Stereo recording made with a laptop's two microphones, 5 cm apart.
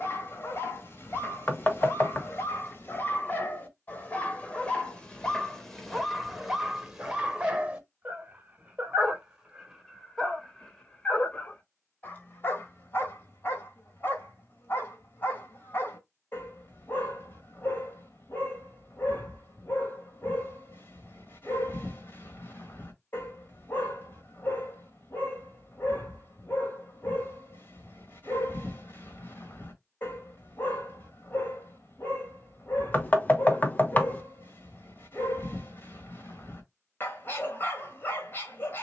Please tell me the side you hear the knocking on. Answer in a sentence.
You can hear the knocking on the left.